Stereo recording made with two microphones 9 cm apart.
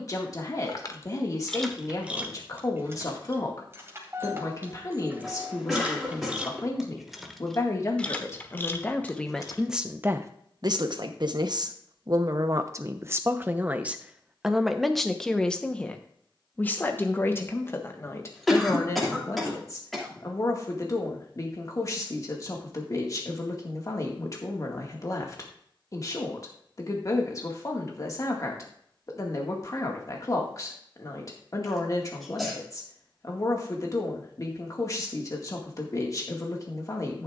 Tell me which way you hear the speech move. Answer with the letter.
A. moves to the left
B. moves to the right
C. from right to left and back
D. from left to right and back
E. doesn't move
D.